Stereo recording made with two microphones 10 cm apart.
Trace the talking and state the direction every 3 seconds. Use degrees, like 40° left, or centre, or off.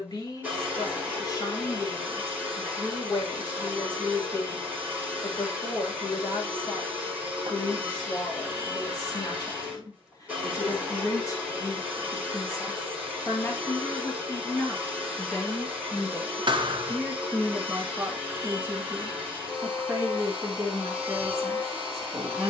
50° left, 50° left, 50° left, 40° left, 20° left, centre, 30° right, 40° right.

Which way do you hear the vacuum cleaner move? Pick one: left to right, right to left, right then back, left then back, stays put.
stays put.